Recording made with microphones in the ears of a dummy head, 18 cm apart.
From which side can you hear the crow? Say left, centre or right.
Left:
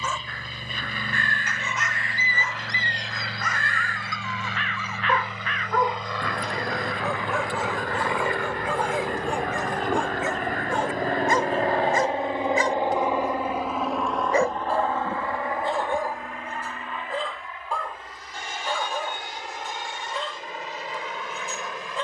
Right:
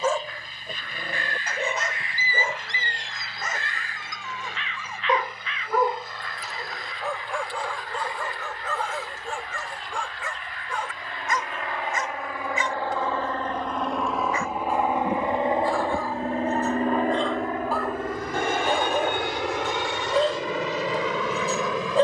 left.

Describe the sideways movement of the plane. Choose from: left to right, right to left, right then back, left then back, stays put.
left to right.